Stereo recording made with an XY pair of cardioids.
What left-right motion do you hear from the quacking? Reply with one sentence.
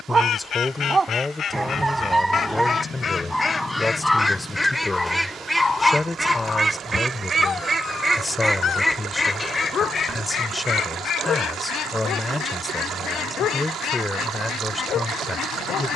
You can hear the quacking move from left to right and back again.